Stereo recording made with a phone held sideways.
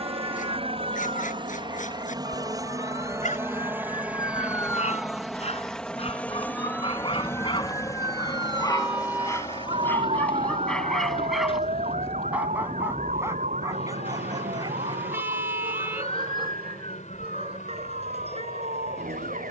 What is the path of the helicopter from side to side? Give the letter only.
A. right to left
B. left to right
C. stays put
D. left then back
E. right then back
A.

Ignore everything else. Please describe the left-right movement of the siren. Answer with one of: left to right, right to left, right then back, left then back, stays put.
left to right.